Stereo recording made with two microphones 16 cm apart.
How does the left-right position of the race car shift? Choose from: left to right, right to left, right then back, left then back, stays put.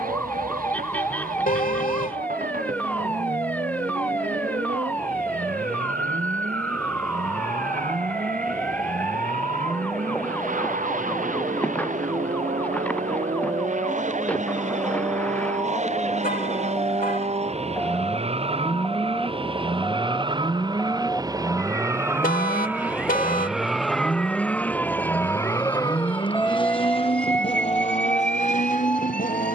right to left.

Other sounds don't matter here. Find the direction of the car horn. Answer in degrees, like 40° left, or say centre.
60° left.